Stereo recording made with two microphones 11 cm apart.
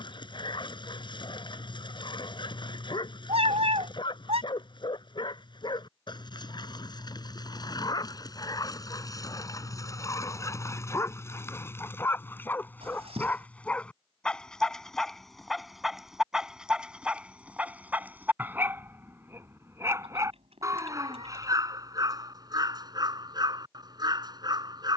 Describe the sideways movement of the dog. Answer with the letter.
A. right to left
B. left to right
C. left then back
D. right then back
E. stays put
B.